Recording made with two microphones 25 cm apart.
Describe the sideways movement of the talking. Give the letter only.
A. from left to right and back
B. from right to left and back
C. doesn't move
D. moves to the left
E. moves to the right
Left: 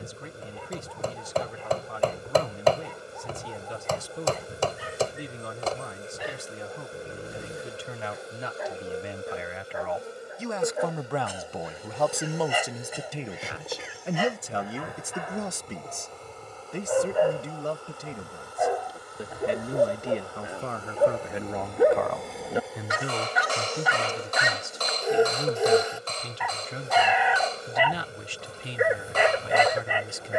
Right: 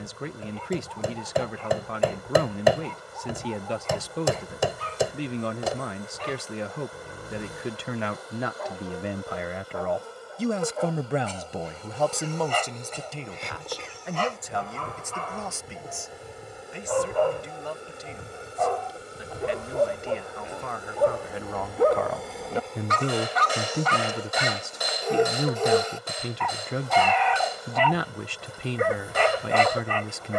B.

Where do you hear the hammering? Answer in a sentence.
In this clip you hear the hammering in the centre.